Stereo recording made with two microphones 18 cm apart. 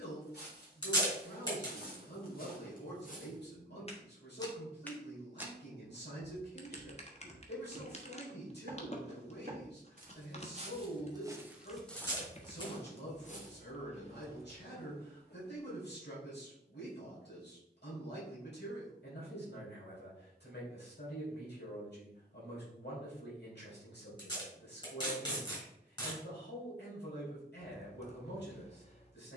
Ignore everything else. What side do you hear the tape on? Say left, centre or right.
left.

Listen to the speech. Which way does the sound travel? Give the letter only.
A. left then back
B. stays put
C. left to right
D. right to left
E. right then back
B.